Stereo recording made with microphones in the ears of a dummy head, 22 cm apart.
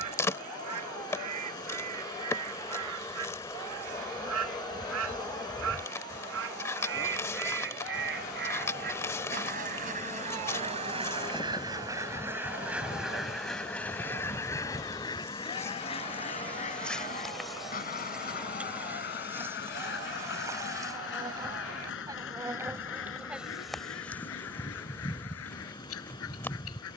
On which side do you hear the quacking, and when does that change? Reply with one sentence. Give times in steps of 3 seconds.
You can hear the quacking on the right from 0 s, in the centre from 12 s and on the left from 15 s.